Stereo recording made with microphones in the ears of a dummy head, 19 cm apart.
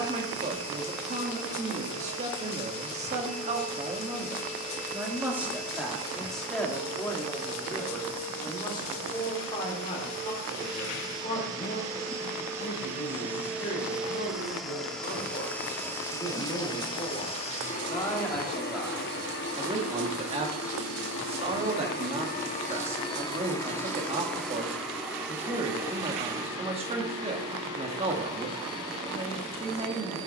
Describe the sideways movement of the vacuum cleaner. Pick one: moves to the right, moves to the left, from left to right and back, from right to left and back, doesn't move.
from right to left and back.